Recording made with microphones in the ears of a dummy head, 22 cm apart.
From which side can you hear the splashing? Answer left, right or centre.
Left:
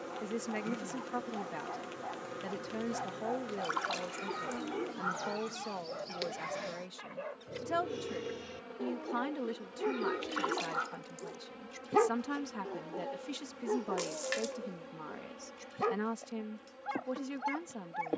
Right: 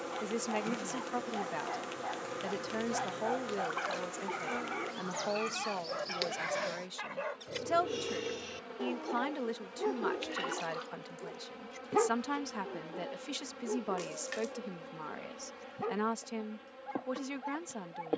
left.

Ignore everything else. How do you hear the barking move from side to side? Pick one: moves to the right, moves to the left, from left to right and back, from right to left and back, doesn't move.
moves to the left.